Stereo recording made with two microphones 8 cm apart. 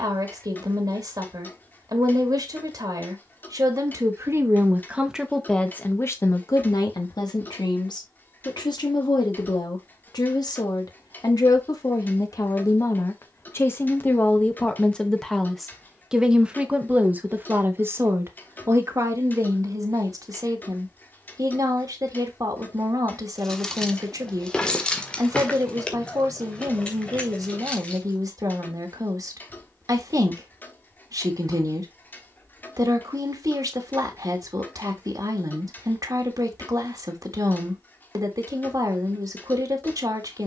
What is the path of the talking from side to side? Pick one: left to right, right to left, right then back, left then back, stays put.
left then back.